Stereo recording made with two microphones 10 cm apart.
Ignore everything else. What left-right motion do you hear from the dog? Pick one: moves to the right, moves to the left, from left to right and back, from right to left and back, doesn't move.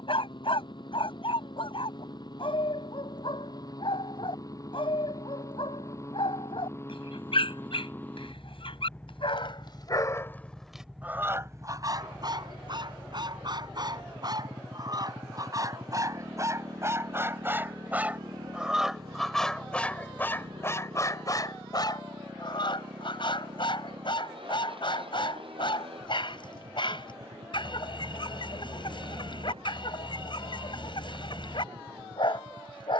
from left to right and back.